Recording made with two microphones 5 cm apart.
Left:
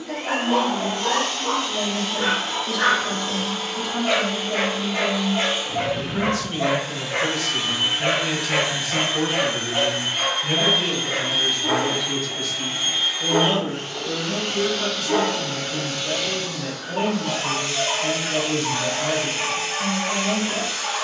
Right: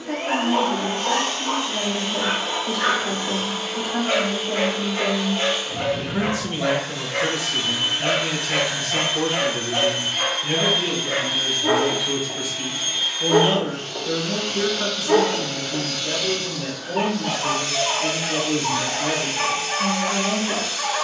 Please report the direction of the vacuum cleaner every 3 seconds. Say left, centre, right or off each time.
right, centre, left, left, left, left, left.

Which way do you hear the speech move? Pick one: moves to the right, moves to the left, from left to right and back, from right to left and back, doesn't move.
from right to left and back.